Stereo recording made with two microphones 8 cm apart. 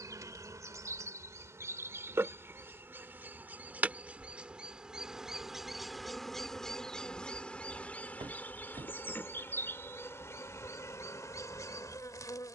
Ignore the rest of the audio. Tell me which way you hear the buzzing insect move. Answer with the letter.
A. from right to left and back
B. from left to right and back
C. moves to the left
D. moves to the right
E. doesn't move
C.